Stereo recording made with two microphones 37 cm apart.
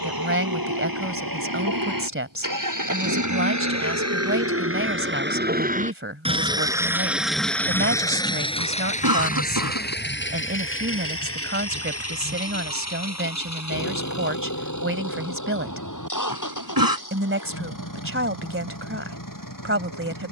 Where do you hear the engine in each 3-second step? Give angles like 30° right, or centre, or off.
60° right, 40° right, centre, 30° left, 40° left, 50° left, 60° left.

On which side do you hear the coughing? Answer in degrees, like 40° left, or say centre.
70° right.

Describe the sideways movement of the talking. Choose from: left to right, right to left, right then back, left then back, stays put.
stays put.